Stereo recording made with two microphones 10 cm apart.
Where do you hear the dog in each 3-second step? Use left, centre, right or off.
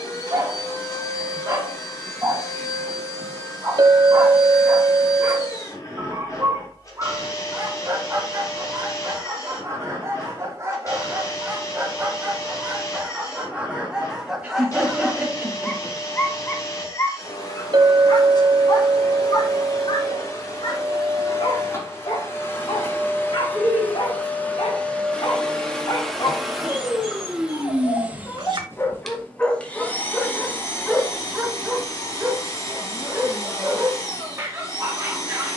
right, right, right, right, centre, left, left, left, left, left, centre, right.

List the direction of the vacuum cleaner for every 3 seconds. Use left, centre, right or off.
left, left, left, left, left, left, left, left, centre, centre, left, left.